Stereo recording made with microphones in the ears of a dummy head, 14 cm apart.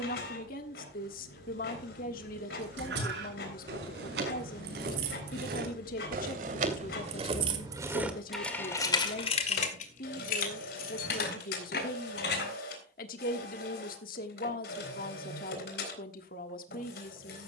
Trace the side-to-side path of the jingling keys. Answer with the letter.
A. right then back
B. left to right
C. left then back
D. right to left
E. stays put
D.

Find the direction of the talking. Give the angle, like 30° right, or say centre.
60° left.